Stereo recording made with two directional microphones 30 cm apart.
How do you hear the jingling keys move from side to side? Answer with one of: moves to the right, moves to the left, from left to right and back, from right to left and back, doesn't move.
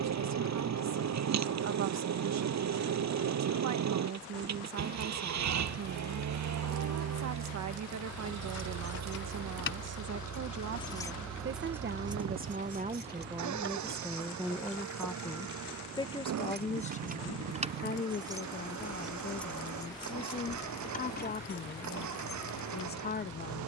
from left to right and back.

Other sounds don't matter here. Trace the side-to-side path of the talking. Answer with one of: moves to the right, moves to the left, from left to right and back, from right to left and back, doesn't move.
moves to the left.